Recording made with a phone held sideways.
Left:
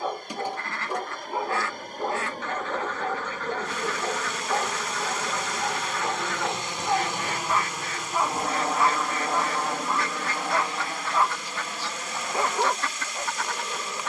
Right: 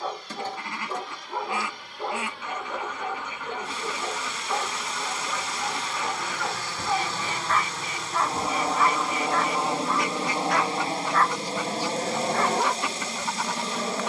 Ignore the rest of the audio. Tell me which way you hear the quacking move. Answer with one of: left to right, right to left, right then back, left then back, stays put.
stays put.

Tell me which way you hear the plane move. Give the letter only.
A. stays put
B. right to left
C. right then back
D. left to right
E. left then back
D.